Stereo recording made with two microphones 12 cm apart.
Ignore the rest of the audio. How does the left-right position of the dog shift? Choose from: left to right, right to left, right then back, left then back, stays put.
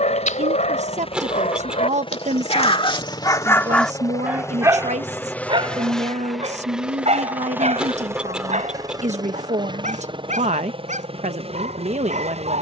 left to right.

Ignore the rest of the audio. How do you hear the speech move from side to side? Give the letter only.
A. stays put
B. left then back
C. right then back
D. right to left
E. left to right
A.